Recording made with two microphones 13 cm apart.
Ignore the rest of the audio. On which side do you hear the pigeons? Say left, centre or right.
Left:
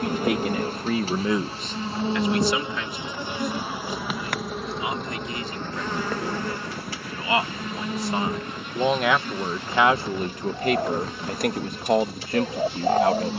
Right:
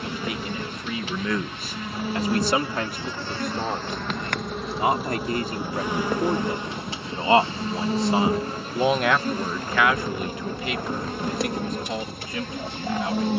left.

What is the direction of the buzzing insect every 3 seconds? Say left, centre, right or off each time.
left, centre, right, right, right.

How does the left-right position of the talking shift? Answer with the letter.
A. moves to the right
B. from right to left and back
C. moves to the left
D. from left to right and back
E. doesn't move
D.